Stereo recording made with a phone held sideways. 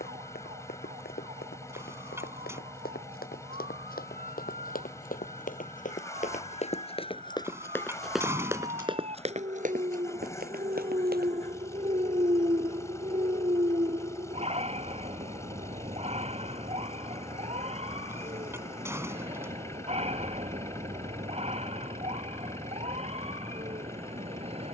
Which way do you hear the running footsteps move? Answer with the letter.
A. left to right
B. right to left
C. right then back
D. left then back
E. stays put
A.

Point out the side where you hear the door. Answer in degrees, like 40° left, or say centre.
20° right.